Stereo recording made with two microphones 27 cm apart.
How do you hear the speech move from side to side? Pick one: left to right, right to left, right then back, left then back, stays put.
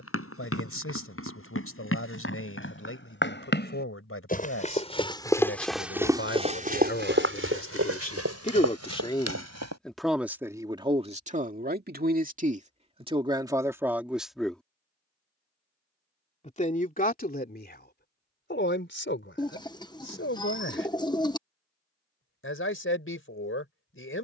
right then back.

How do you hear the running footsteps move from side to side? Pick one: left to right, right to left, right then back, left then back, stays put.
left to right.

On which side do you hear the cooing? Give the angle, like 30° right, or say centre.
20° left.